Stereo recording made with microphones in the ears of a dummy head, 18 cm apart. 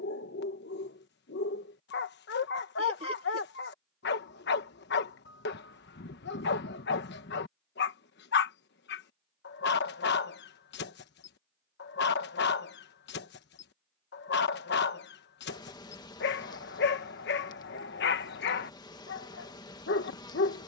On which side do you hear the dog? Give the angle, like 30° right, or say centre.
60° left.